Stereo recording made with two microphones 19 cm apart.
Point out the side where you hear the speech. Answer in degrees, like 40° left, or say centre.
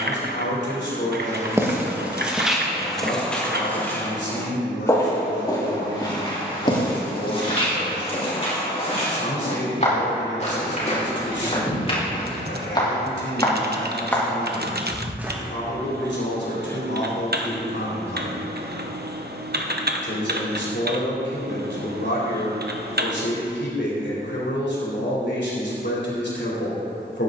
70° left.